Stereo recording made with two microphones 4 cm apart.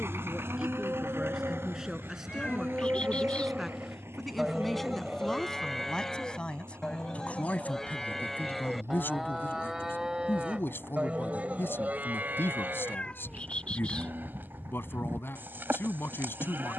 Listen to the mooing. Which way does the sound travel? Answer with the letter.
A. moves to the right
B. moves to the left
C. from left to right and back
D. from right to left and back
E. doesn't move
D.